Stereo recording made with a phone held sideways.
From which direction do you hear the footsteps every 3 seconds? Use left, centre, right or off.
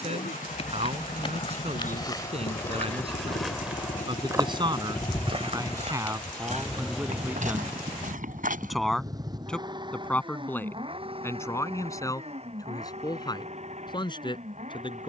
left, right, right, off, off.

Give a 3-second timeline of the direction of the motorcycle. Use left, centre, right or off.
left, left, centre, right, right.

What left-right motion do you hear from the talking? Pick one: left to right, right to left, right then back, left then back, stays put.
right to left.